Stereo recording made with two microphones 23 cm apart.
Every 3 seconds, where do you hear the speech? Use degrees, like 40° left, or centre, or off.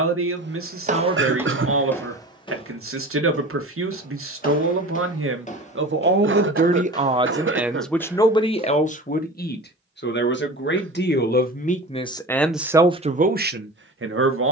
70° right, 70° right, 10° right, 40° left, 30° right.